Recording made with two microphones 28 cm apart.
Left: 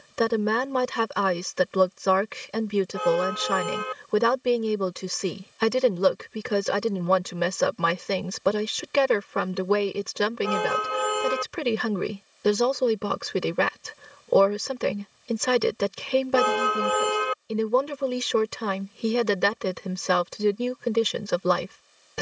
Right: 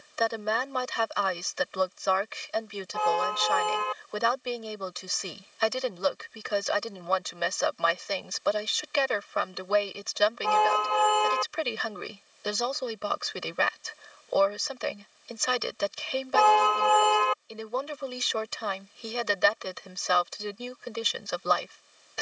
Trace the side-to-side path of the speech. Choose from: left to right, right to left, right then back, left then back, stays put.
stays put.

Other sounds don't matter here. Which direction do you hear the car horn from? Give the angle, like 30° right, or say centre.
20° left.